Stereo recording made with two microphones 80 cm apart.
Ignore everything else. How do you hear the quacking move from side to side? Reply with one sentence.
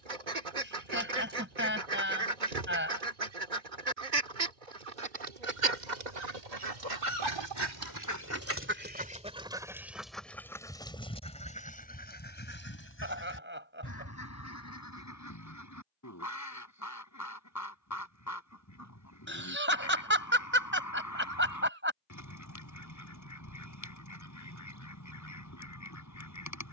In this clip you hear the quacking move from right to left.